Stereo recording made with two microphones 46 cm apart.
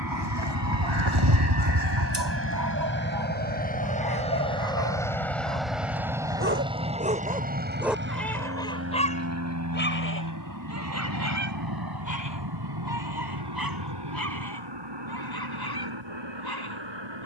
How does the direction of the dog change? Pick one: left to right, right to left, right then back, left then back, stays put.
right to left.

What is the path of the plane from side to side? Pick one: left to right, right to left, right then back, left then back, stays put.
left to right.